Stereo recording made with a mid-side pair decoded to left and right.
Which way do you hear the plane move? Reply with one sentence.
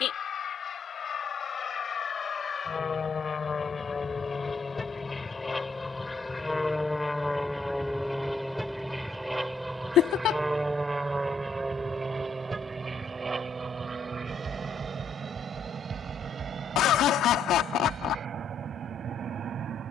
In this clip you hear the plane go from the left side to the right.